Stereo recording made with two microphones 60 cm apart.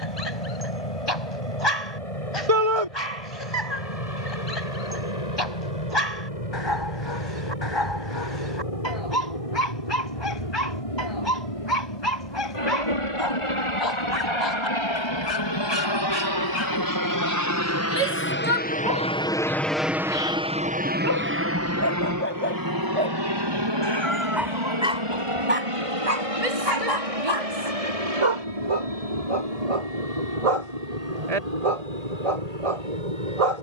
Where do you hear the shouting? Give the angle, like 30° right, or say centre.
60° right.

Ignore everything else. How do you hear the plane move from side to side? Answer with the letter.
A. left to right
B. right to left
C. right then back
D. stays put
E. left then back
A.